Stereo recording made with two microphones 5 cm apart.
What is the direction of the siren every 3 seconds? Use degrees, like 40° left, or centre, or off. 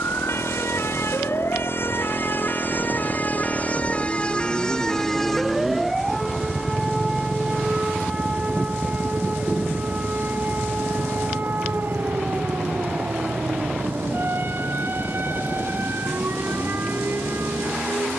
60° left, 20° left, 20° right, 40° right, 50° right, 50° right.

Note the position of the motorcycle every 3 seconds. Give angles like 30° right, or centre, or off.
50° right, 20° right, 20° left, 50° left, 60° left, 70° left.